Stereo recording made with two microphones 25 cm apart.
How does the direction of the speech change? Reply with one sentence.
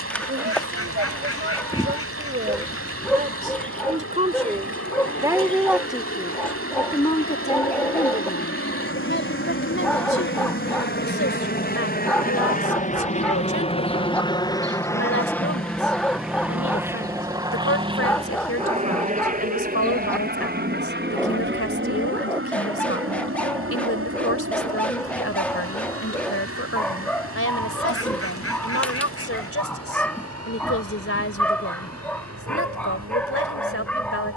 You can hear the speech move from right to left.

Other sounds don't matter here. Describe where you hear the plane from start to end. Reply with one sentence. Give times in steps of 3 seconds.
In this clip you hear the plane on the left from 0 s, in the centre from 15 s and on the right from 18 s.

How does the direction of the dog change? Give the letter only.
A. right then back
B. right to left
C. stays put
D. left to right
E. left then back
C.